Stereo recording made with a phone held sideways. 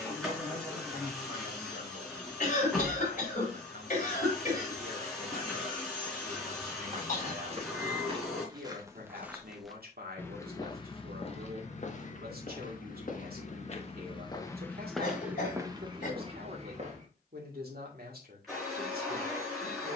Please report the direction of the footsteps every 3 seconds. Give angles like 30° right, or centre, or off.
off, off, 30° right, 20° left, 40° left, 30° right, off.